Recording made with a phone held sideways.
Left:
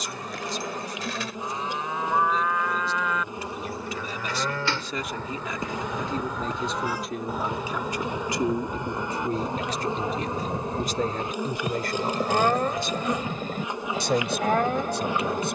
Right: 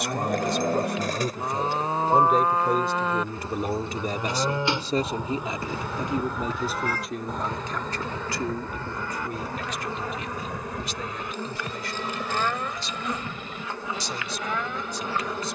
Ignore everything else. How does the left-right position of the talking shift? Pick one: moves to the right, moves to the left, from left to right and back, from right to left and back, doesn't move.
moves to the left.